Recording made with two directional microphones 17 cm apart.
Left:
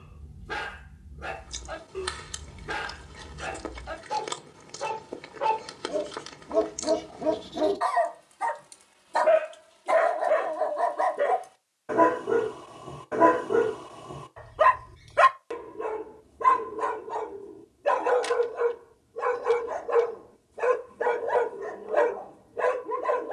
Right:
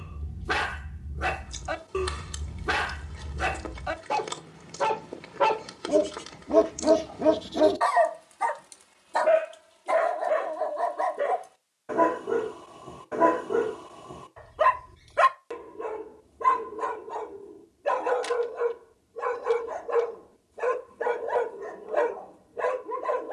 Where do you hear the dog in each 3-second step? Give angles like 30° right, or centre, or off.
70° right, 70° right, 30° right, 10° left, 10° left, 10° left, 10° left, 10° left.